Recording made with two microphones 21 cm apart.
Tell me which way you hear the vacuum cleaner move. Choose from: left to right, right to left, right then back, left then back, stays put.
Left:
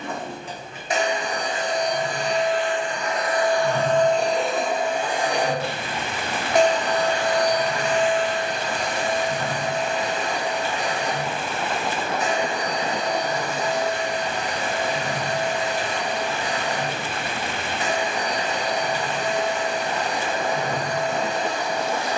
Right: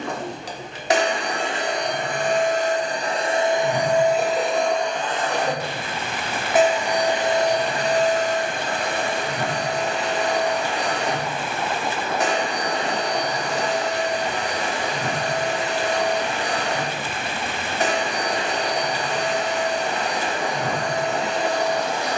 left then back.